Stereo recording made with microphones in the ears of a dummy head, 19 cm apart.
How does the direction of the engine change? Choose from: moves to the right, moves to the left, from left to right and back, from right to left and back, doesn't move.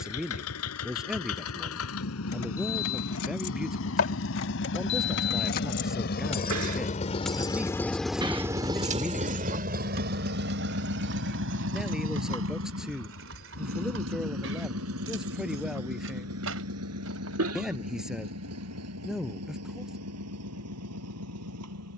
moves to the right.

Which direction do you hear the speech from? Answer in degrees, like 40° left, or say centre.
centre.